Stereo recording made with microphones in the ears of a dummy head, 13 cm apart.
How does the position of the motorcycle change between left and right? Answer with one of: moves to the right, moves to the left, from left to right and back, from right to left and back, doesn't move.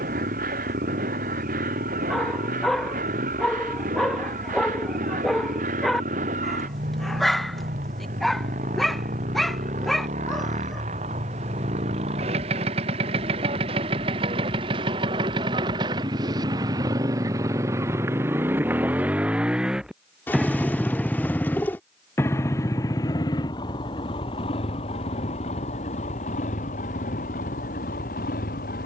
moves to the left.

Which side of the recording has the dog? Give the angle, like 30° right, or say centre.
centre.